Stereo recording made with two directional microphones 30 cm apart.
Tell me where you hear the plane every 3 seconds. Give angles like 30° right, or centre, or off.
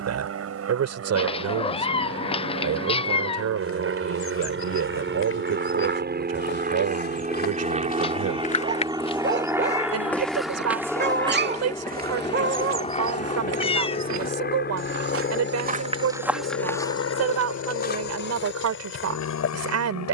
60° right, 40° right, 20° right, centre, 20° left, 40° left, 50° left.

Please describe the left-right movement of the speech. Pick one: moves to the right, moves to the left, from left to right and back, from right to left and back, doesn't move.
doesn't move.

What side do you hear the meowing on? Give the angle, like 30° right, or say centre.
20° left.